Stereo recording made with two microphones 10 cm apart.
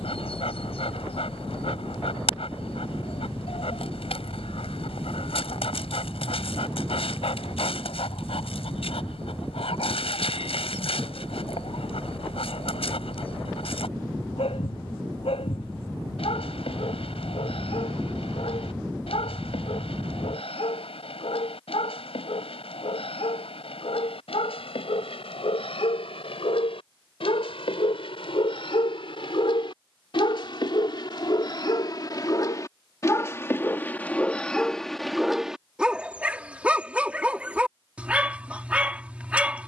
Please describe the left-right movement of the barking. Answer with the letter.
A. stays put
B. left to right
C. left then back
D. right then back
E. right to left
B.